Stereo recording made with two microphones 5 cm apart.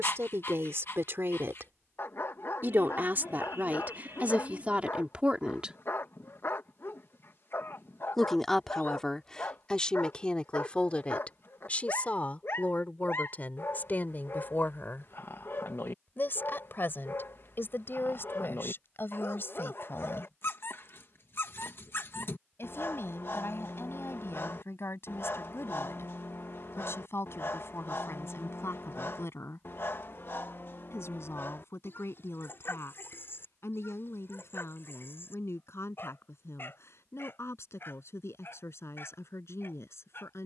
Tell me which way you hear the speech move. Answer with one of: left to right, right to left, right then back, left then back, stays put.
right to left.